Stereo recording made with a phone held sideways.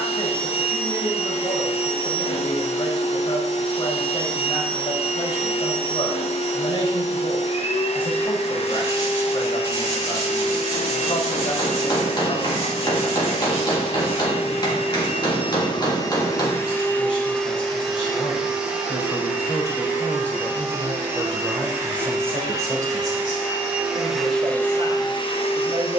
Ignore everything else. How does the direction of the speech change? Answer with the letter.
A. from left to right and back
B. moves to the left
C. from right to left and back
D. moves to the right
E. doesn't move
D.